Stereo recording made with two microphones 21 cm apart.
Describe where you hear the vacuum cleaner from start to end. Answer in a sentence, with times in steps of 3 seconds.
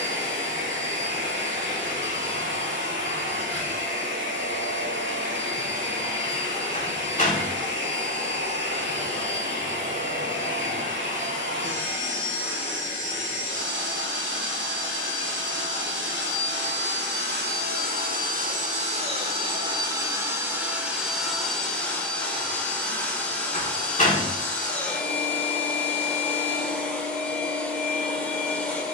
In this clip you hear the vacuum cleaner on the right from 0 s and in the centre from 21 s.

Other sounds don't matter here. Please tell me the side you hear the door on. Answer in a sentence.
You can hear the door on the left.